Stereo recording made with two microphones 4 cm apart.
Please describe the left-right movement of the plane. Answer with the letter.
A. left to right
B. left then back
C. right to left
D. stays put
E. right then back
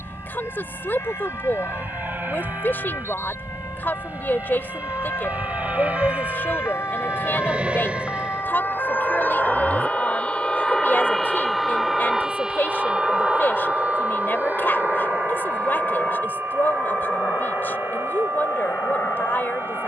C.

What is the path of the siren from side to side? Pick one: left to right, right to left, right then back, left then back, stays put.
left to right.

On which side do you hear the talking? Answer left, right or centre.
left.